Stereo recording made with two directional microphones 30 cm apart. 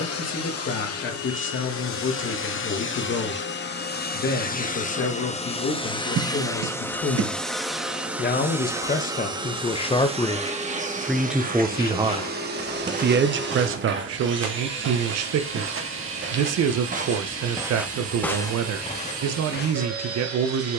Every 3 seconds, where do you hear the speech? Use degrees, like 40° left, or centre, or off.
40° left, 40° left, 40° left, 10° left, 50° right, 60° right, 60° right.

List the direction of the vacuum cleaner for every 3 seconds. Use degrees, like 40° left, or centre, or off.
50° left, 30° left, centre, 20° right, 40° right, 50° right, 60° right.